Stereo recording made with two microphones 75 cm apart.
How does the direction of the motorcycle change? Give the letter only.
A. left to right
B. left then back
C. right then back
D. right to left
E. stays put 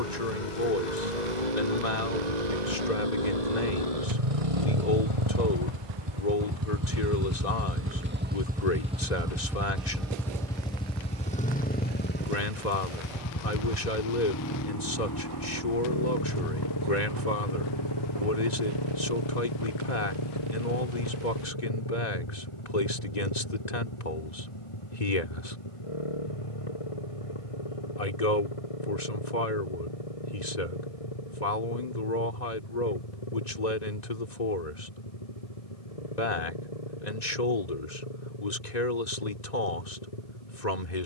D.